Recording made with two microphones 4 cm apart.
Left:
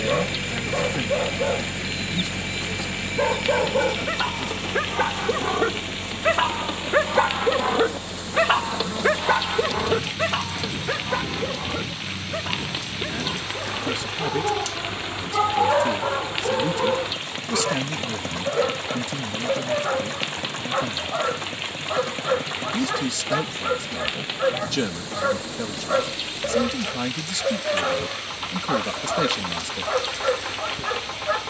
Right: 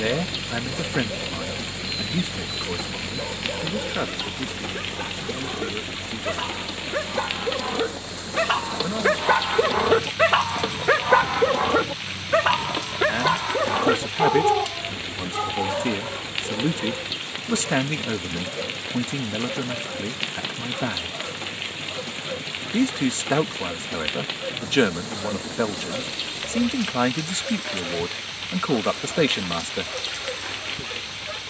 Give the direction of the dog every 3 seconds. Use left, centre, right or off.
left, left, left, right, right, left, left, left, left, left, left.